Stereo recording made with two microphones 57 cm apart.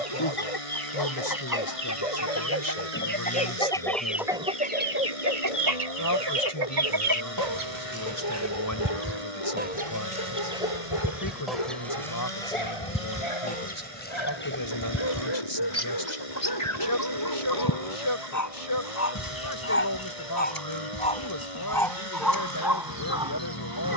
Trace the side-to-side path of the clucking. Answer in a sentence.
You can hear the clucking go right and come back.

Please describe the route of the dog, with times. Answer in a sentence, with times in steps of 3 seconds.
In this clip you hear the dog on the left from 0 s and in the centre from 21 s.